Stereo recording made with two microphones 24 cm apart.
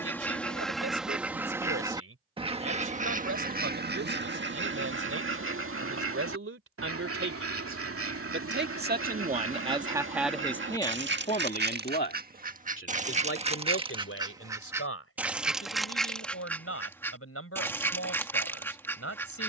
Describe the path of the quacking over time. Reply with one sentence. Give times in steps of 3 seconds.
In this clip you hear the quacking in the centre from 0 s, on the right from 3 s and in the centre from 15 s.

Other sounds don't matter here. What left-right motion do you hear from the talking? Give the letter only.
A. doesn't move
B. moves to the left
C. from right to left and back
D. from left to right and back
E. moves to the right
B.